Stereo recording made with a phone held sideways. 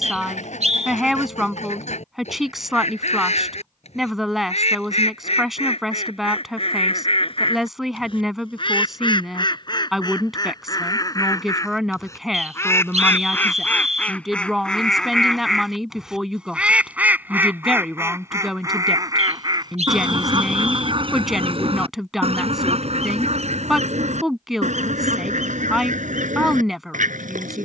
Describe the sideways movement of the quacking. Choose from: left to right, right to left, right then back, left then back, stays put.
left to right.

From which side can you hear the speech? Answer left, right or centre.
centre.